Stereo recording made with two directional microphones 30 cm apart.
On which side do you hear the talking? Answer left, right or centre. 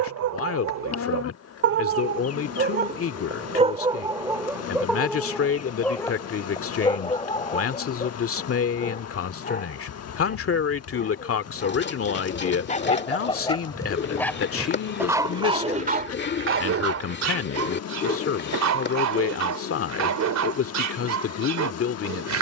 left.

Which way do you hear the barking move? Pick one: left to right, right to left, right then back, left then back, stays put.
left then back.